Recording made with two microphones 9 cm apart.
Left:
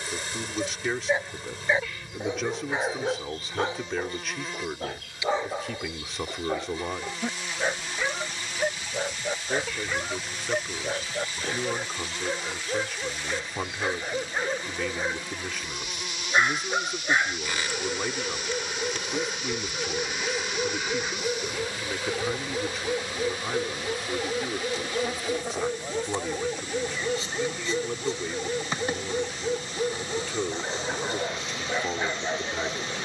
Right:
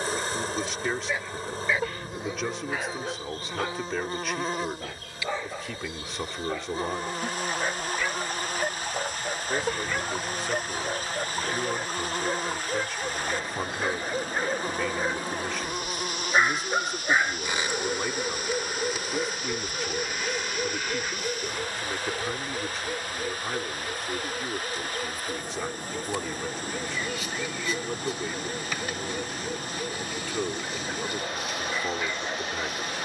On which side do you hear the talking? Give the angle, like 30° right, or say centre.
centre.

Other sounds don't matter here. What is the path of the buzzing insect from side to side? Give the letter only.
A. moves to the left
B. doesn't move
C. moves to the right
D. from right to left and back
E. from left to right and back
A.